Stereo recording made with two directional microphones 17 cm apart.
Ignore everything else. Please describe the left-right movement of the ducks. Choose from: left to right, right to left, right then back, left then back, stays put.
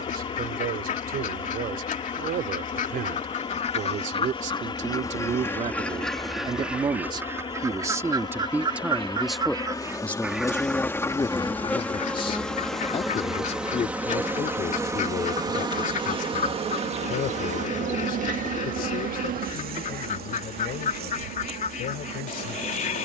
right then back.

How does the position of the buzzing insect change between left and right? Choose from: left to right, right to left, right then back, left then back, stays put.
left to right.